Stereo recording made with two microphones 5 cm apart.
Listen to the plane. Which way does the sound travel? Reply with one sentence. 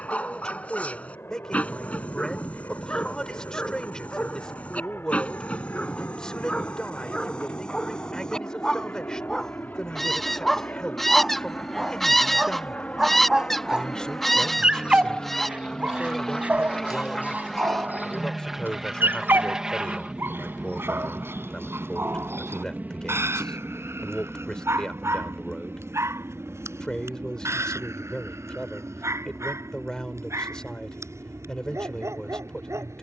You can hear the plane move from left to right.